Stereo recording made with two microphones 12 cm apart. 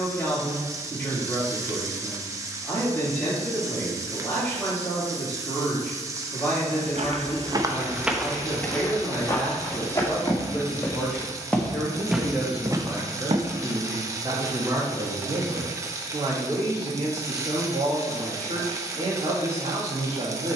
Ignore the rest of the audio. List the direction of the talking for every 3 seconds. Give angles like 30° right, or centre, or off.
20° left, 20° left, 20° left, 10° left, 20° right, 40° right, 50° right.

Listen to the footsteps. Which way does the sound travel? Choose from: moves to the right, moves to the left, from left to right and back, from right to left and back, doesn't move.
from right to left and back.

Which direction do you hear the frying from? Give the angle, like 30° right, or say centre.
20° right.